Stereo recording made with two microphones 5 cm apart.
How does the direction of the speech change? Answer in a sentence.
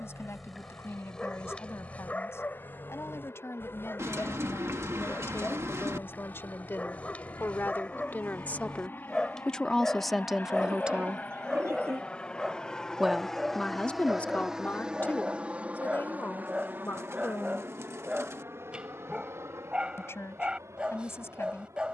You can hear the speech move from left to right and back again.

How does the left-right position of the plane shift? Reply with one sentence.
In this clip you hear the plane travel towards the right.